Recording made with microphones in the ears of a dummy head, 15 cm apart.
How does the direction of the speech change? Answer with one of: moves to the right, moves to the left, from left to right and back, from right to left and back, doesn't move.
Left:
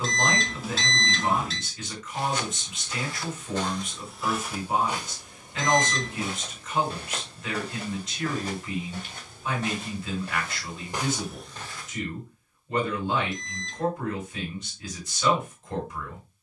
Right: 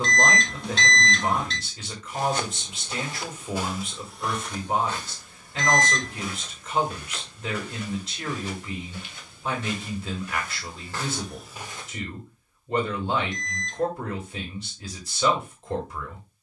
doesn't move.